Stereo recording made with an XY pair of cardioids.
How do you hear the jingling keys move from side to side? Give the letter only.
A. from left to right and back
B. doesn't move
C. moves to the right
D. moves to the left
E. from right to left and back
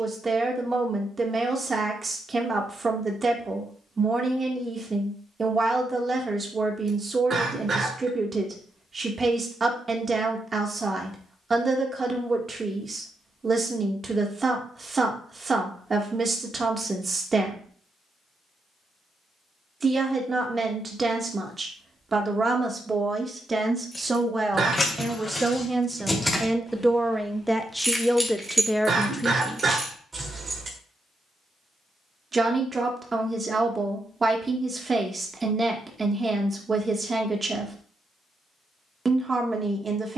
C.